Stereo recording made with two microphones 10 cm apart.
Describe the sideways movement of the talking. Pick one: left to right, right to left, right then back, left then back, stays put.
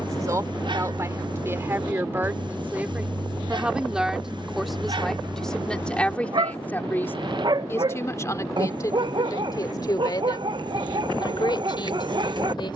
right to left.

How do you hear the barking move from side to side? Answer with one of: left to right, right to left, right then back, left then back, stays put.
stays put.